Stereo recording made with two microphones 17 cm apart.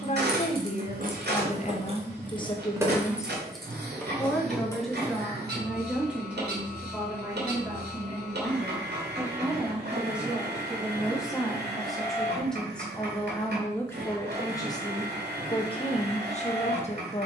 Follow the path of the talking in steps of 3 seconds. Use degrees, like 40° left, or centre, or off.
40° left, centre, 10° right, 10° right, 10° left, 40° left.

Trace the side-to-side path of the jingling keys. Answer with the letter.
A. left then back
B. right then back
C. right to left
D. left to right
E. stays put
C.